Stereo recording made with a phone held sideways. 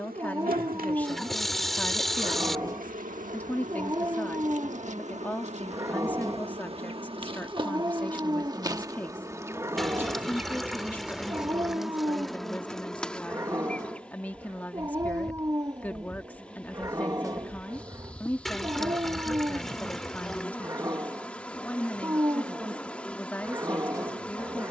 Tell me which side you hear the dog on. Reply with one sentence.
You can hear the dog on the right.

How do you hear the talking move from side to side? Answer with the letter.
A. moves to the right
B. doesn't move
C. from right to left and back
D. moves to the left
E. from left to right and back
B.